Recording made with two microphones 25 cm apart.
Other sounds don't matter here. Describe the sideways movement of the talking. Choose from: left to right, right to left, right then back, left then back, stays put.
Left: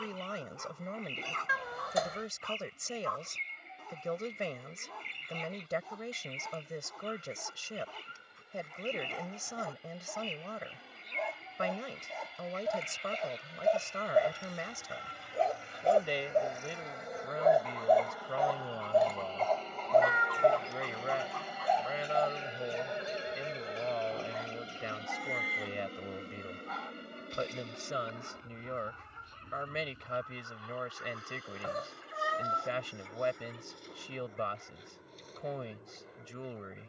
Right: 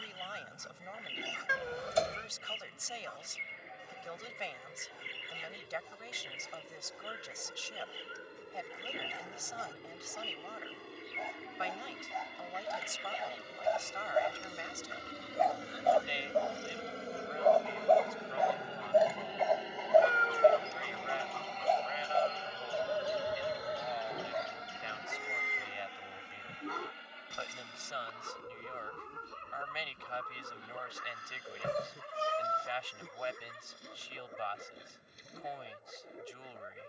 stays put.